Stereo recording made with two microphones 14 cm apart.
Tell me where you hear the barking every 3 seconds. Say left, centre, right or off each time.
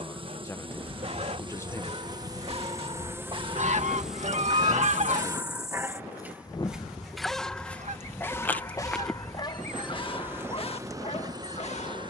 right, right, centre, left.